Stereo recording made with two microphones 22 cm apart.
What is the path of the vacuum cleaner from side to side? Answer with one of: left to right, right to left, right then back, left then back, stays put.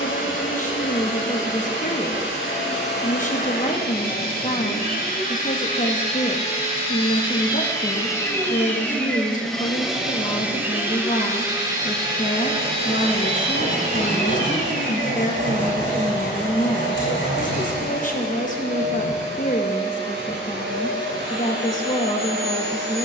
left to right.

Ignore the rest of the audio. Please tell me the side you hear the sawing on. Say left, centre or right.
left.